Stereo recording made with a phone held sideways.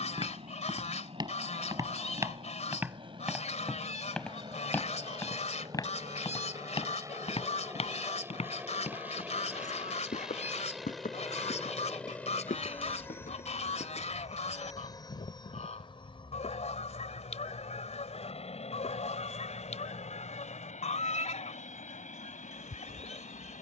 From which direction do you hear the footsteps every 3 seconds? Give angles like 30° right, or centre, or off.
30° right, 10° left, 40° left, 60° left, 70° left, off, off, off.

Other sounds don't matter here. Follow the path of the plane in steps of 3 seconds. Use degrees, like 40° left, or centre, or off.
50° right, 40° right, 20° right, centre, 20° left, 40° left, 50° left, 60° left.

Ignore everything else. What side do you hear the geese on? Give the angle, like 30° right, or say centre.
60° left.